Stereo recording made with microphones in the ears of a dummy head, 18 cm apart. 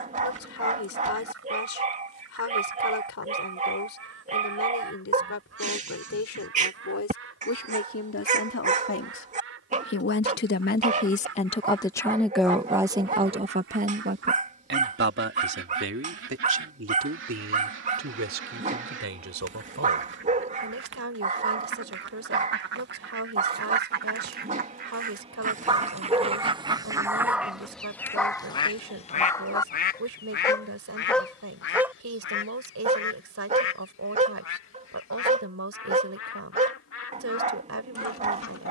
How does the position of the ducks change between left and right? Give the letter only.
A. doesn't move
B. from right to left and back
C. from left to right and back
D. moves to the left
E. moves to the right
D.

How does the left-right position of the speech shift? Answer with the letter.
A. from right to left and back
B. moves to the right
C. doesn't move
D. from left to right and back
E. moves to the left
B.